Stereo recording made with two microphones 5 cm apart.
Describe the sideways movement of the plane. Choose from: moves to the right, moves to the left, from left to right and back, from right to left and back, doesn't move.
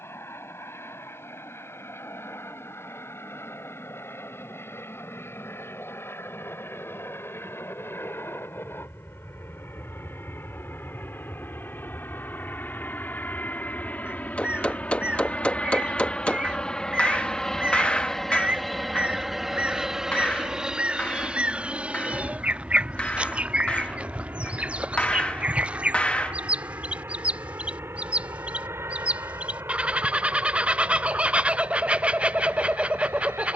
moves to the right.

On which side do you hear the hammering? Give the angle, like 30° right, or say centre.
30° left.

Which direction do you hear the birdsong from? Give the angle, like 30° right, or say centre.
20° right.